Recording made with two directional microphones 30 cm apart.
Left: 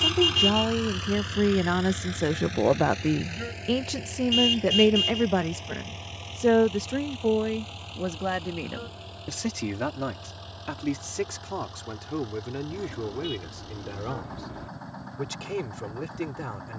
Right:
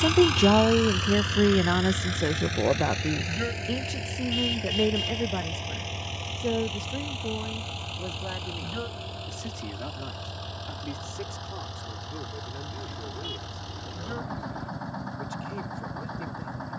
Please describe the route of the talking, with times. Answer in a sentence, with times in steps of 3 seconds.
In this clip you hear the talking in the centre from 0 s and on the left from 3 s.